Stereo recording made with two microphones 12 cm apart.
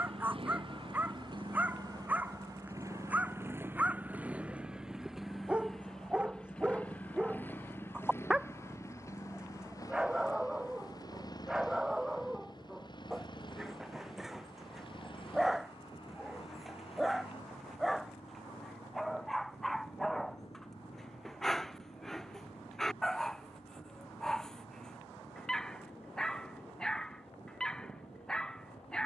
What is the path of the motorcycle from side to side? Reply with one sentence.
You can hear the motorcycle travel towards the left.